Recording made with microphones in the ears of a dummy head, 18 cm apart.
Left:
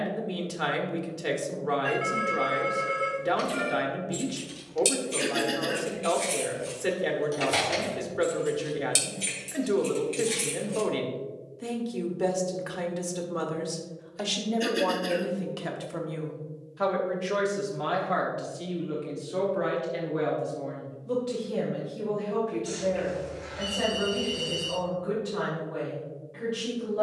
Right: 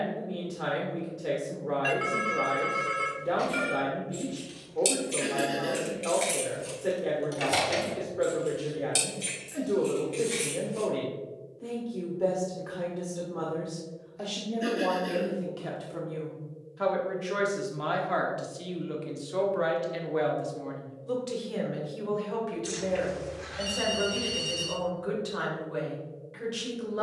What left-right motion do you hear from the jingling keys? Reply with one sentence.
You can hear the jingling keys move from left to right and back again.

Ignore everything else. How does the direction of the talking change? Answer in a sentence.
You can hear the talking go from the left side to the right.